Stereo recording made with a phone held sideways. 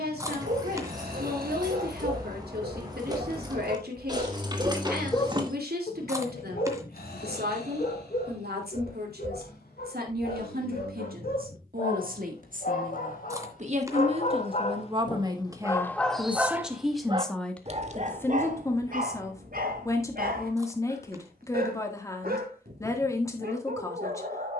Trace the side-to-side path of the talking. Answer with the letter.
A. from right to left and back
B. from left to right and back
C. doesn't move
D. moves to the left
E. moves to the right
D.